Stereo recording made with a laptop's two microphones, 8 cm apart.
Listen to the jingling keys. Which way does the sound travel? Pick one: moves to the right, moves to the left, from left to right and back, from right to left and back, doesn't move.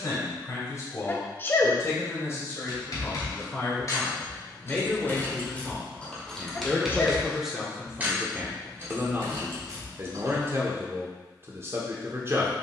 moves to the right.